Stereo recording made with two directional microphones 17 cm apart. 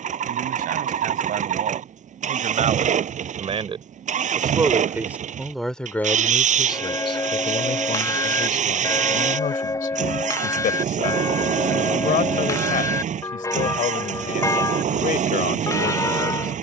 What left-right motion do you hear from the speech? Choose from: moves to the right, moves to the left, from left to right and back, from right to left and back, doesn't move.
moves to the left.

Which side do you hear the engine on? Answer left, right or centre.
right.